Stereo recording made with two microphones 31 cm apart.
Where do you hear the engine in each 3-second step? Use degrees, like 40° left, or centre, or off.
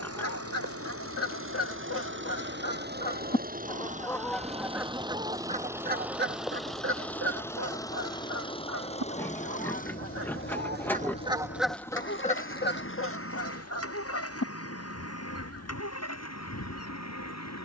40° right, 20° right, 10° left, 30° left, 40° left, 50° left.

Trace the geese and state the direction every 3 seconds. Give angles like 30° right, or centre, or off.
50° left, centre, 50° right, 30° right, 40° left, 50° left.